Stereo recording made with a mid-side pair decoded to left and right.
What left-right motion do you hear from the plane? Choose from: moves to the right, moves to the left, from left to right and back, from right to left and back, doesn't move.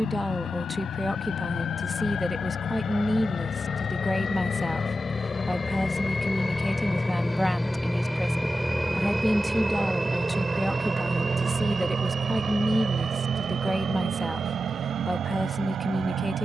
moves to the right.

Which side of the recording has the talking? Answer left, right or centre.
centre.